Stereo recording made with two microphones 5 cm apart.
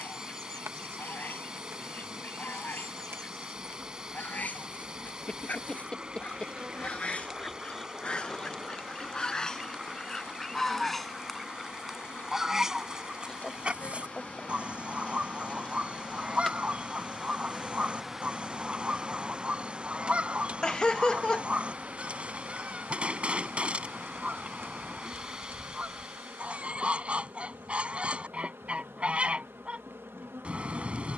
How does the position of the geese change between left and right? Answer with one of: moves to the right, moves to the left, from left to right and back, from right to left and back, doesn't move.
moves to the right.